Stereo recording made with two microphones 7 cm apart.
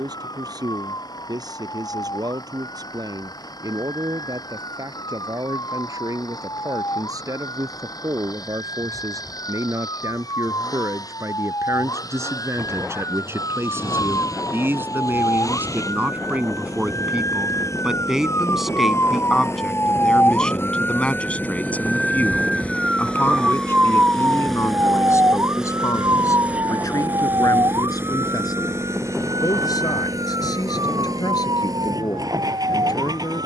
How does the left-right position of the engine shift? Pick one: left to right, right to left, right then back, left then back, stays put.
left to right.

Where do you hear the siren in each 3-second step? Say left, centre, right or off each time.
left, left, left, left, left, left, left, centre, right, right, right.